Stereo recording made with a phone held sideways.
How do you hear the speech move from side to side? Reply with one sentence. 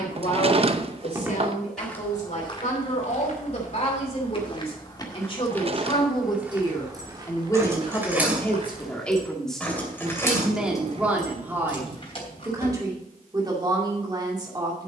In this clip you hear the speech travel towards the right.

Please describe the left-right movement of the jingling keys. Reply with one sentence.
You can hear the jingling keys move to the left.